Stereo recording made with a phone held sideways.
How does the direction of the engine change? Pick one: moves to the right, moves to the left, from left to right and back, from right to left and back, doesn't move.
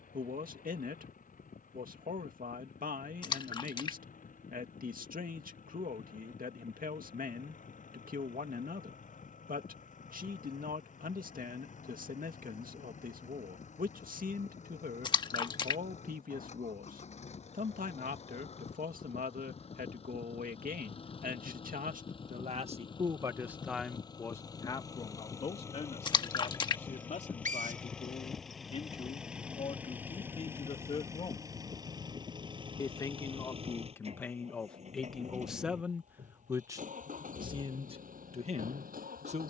moves to the right.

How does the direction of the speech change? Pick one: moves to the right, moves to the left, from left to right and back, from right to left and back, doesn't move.
from right to left and back.